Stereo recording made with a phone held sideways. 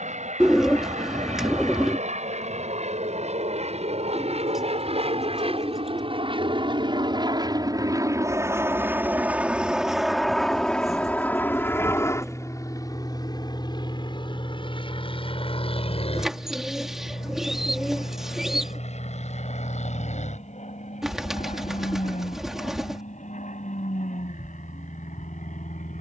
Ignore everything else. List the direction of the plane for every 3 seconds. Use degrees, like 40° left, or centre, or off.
70° right, 60° right, 30° right, centre, 30° left, 50° left, 50° left, 60° left, 60° left.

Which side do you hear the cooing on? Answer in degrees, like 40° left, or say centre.
centre.